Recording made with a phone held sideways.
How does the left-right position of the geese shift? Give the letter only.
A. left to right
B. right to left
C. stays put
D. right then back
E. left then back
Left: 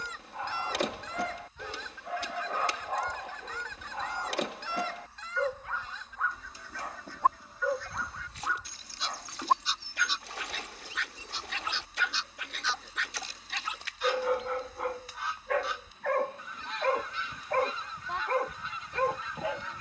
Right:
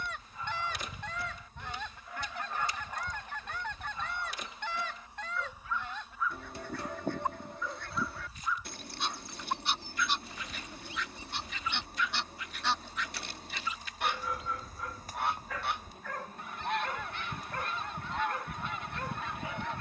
C.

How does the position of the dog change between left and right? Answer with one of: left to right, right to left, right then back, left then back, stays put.
stays put.